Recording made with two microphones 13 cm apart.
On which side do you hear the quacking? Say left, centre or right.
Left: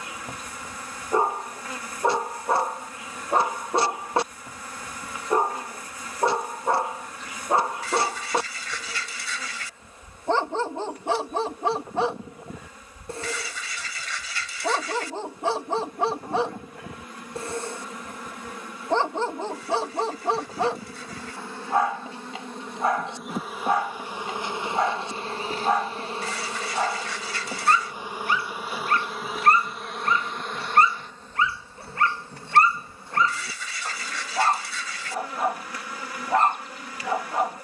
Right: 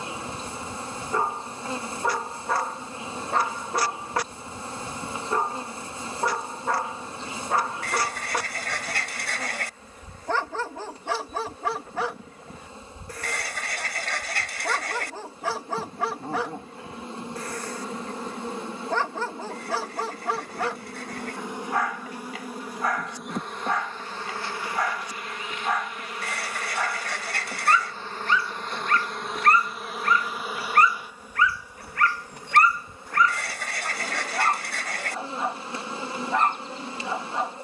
right.